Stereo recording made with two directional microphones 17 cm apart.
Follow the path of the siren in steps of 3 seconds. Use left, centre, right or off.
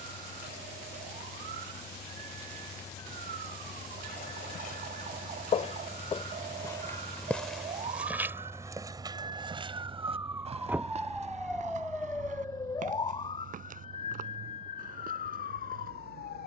right, right, right, centre, left, left.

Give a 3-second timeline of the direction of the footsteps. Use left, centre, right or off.
off, left, centre, right, right, right.